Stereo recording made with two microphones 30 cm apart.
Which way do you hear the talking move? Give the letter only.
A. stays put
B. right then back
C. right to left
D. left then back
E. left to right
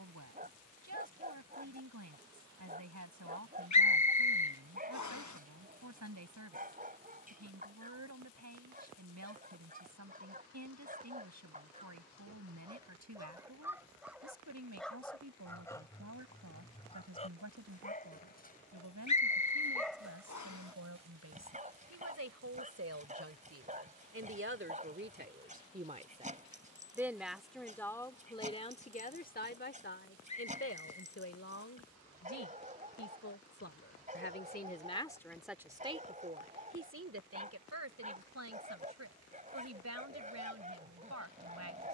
D.